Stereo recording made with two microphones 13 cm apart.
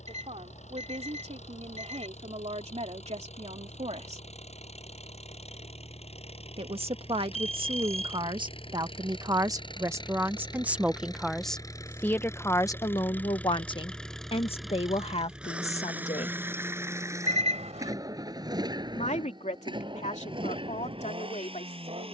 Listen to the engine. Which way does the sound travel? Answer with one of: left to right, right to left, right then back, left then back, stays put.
left to right.